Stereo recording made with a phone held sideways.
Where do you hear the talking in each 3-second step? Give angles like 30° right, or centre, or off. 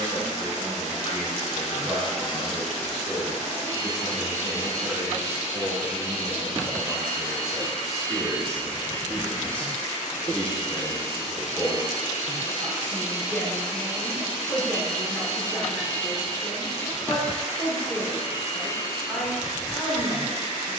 10° left, 10° right, centre, 10° left, 10° left, 10° left, 10° left.